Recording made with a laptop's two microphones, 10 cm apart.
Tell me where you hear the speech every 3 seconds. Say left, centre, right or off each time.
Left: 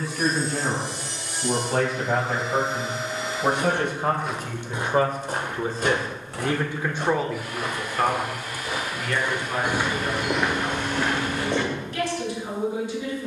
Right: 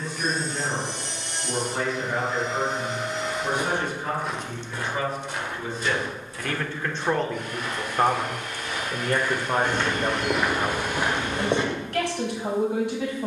left, left, centre, right, right.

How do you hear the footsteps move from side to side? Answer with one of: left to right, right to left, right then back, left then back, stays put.
left then back.